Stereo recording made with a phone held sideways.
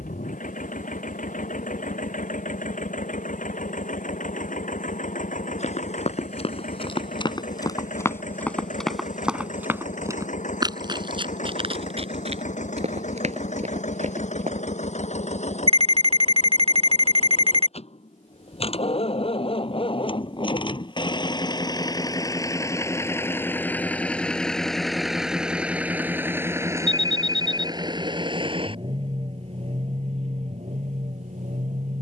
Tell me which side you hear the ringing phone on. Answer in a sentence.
In this clip you hear the ringing phone on the right.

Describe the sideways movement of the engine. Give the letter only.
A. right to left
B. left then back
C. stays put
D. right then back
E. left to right
E.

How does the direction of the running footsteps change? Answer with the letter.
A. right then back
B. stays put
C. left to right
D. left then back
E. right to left
C.